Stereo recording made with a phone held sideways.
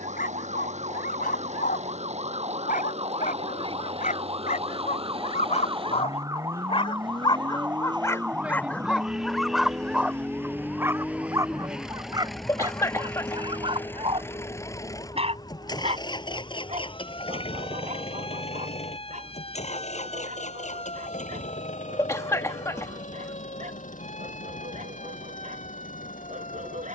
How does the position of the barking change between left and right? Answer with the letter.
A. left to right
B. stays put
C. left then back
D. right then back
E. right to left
A.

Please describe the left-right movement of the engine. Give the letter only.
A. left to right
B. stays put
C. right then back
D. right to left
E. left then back
D.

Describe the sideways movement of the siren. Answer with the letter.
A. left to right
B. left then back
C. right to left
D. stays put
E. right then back
C.